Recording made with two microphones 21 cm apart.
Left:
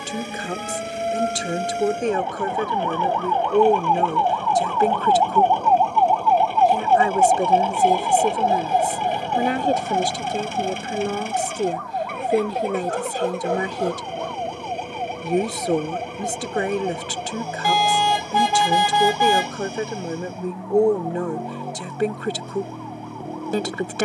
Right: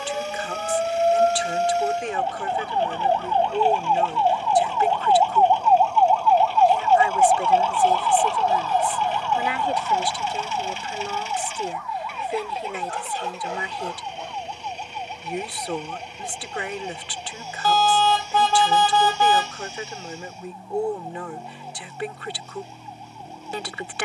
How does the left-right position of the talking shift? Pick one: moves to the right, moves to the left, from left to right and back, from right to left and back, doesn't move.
doesn't move.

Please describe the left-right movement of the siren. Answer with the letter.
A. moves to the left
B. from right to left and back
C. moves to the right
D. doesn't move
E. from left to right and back
A.